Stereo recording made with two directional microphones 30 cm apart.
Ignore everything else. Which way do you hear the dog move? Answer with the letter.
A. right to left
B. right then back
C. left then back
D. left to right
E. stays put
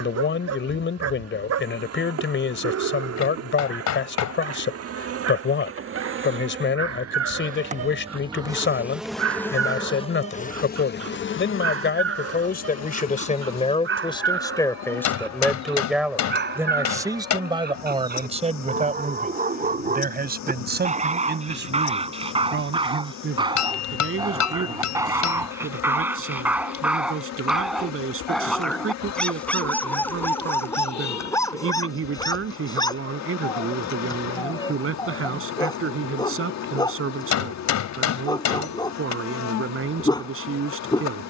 A.